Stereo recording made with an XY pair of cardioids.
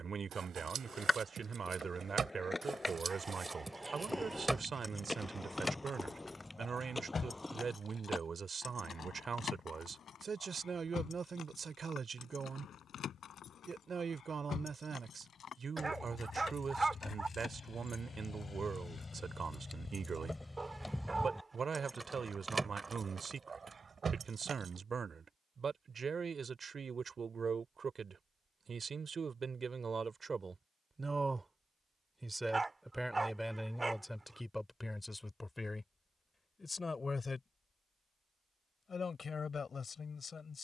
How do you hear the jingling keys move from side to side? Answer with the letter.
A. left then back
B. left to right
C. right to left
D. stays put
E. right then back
A.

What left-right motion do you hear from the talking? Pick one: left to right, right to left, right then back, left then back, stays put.
right to left.